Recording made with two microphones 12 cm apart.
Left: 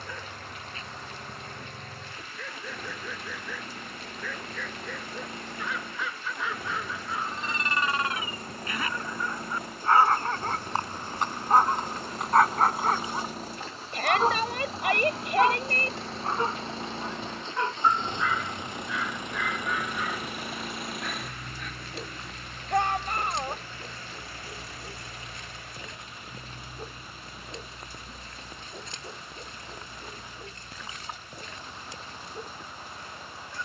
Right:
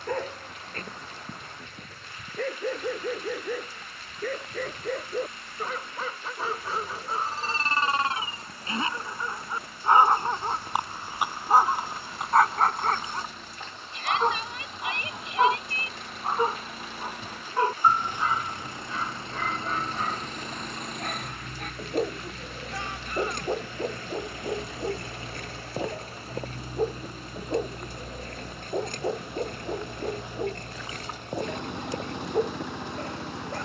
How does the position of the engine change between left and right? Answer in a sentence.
You can hear the engine travel towards the right.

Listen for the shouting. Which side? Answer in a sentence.
You can hear the shouting on the left.